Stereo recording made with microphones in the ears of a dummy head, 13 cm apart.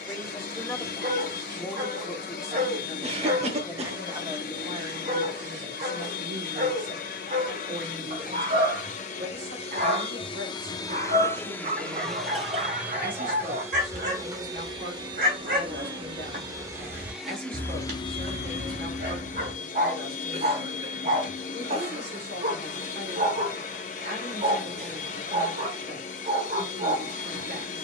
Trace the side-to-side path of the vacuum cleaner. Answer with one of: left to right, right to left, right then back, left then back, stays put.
right then back.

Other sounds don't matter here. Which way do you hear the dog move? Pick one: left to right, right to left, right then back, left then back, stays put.
stays put.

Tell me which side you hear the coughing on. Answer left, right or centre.
right.